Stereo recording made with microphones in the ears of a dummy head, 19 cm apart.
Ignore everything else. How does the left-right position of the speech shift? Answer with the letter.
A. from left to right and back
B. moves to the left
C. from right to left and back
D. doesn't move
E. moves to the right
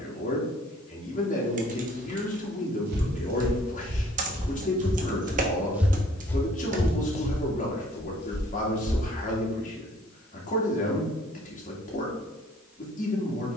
D.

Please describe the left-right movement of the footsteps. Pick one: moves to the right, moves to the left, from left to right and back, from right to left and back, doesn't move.
moves to the left.